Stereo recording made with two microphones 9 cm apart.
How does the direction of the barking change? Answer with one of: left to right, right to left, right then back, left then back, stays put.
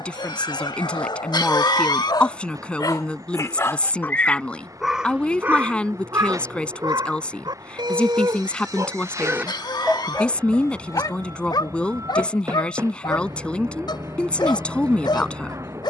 right then back.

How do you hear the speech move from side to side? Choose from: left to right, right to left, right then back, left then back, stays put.
stays put.